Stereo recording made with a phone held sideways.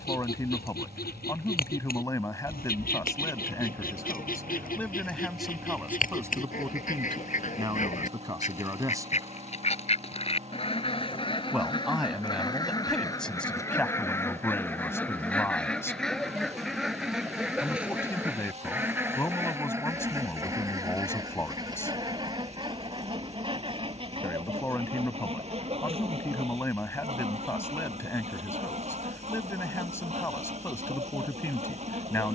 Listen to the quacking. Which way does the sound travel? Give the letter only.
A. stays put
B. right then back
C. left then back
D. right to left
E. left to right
E.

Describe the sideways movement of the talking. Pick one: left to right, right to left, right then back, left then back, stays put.
right then back.